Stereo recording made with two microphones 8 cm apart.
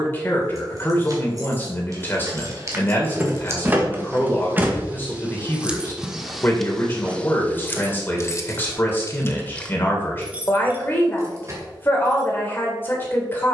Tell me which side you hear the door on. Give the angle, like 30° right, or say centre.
20° right.